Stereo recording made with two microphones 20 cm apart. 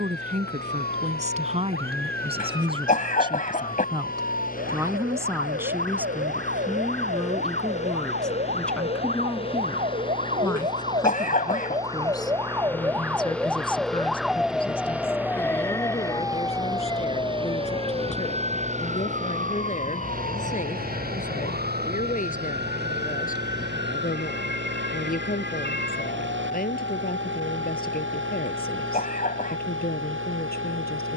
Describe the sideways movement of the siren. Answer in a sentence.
In this clip you hear the siren move to the left.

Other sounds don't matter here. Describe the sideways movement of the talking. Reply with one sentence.
You can hear the talking go from the right side to the left.